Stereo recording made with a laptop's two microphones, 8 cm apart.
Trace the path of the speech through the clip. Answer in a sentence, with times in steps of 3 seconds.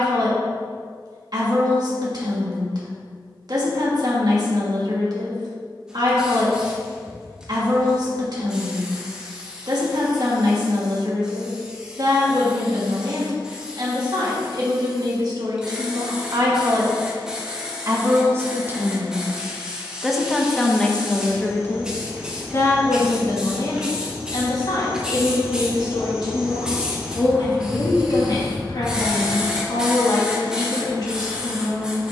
In this clip you hear the speech on the right from 0 s, in the centre from 18 s and on the left from 21 s.